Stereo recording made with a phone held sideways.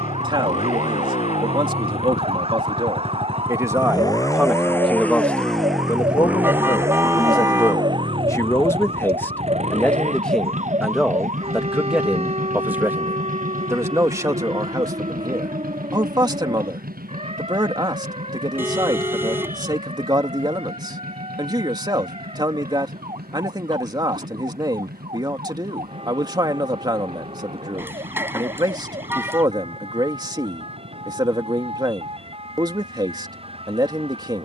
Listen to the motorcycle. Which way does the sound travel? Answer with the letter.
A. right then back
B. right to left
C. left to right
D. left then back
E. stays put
C.